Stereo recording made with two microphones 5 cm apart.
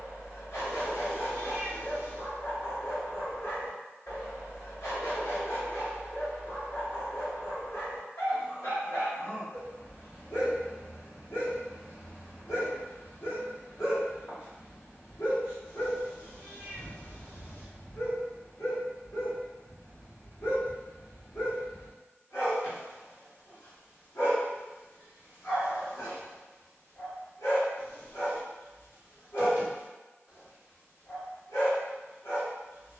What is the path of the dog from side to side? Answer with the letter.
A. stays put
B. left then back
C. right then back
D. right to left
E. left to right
A.